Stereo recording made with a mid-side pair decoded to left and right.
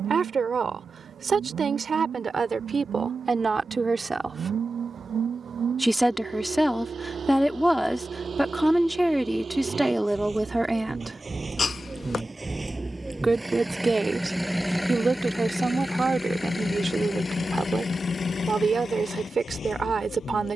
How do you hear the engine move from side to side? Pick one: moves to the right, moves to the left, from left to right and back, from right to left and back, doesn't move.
moves to the left.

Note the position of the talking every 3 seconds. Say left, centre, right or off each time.
right, right, centre, centre, right, right, right.